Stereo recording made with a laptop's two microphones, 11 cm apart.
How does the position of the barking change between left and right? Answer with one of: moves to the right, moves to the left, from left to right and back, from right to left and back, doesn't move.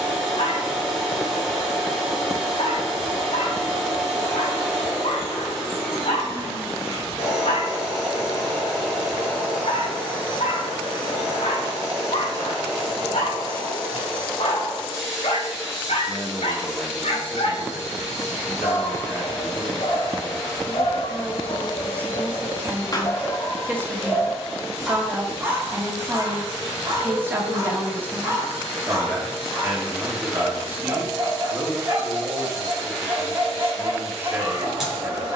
moves to the right.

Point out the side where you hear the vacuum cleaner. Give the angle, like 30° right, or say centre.
centre.